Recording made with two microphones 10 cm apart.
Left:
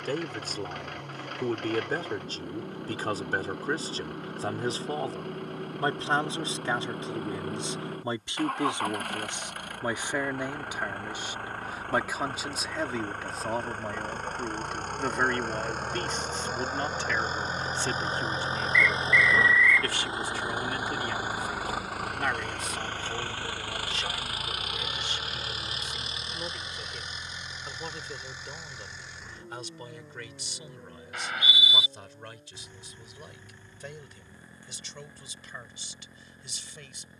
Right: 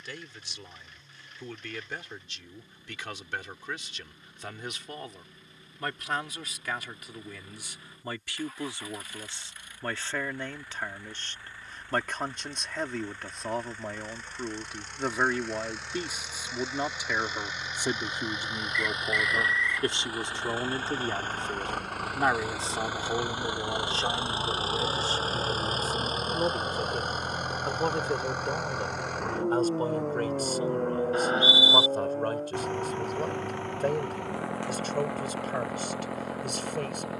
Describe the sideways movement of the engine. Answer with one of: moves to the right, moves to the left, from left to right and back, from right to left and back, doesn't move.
moves to the right.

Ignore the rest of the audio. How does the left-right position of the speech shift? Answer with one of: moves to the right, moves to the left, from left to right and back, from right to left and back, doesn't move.
moves to the right.